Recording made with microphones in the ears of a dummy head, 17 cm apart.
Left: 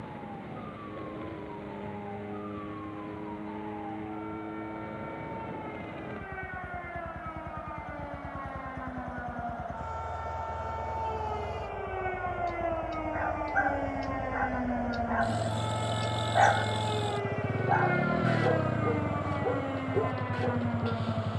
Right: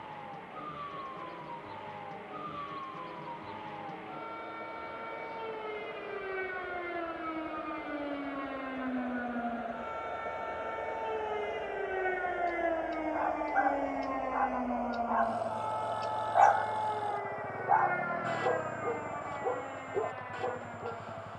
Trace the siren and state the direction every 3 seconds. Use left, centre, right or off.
right, right, right, right, centre, left, left.